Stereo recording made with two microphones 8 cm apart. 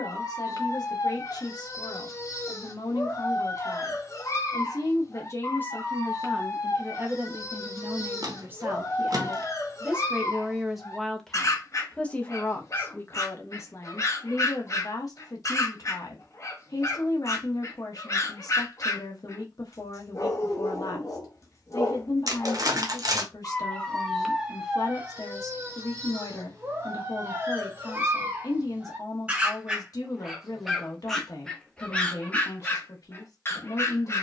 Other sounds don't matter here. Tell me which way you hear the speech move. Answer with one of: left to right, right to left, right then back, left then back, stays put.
right then back.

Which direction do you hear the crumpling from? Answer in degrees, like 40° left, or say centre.
50° right.